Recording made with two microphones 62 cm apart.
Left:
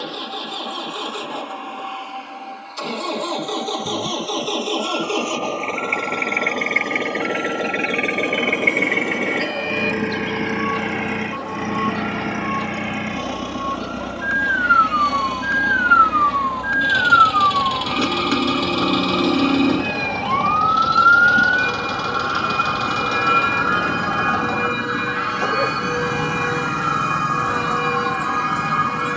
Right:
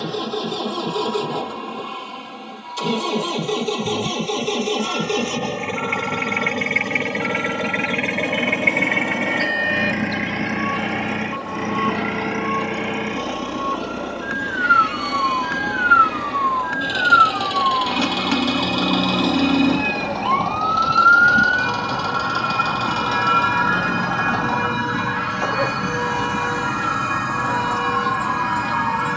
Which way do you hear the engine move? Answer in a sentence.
You can hear the engine go from the right side to the left.